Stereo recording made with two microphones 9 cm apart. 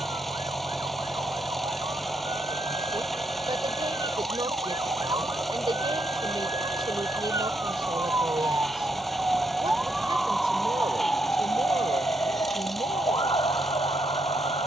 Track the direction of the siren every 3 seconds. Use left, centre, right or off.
right, right, right, centre, left.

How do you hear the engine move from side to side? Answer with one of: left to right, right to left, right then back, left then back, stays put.
stays put.